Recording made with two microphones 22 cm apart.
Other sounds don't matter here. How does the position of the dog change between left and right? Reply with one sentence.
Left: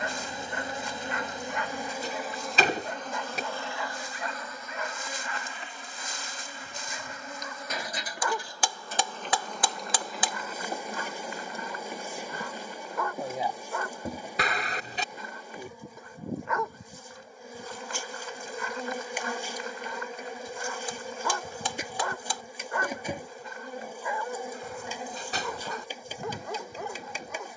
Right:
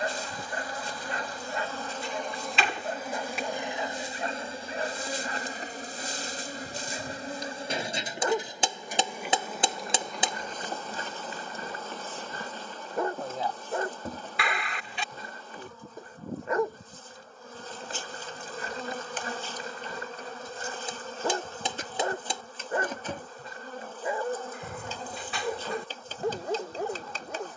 You can hear the dog stay in one place.